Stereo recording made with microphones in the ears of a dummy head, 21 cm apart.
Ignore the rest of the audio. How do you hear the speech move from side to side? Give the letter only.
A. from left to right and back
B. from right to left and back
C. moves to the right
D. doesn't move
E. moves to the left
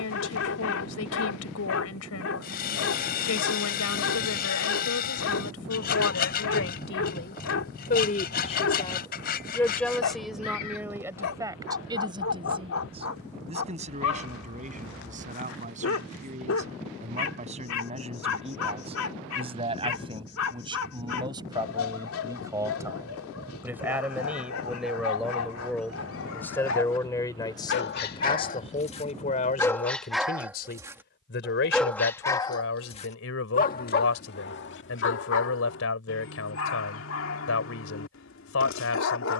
A.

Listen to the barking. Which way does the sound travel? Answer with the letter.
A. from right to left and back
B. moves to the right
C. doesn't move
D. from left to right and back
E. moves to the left
D.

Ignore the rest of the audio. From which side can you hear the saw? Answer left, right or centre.
left.